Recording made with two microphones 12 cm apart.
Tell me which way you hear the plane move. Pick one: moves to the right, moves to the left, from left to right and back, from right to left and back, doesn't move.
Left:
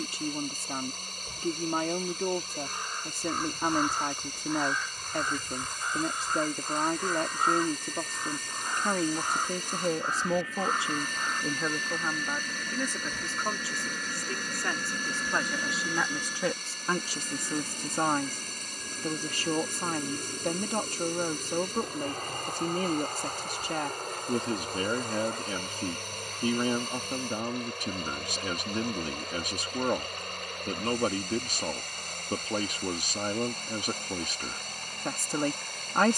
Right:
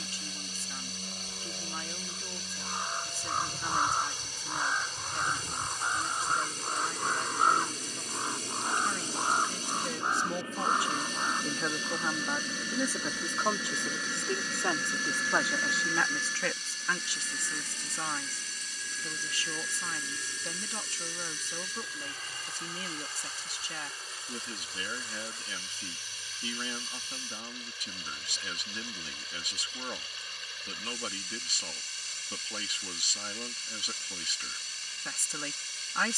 moves to the left.